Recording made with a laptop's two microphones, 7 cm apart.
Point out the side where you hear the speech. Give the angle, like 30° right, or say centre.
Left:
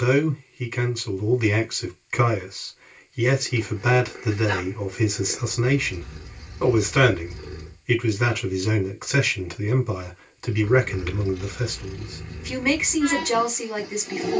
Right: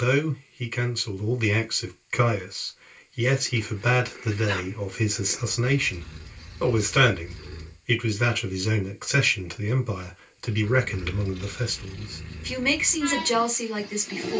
10° left.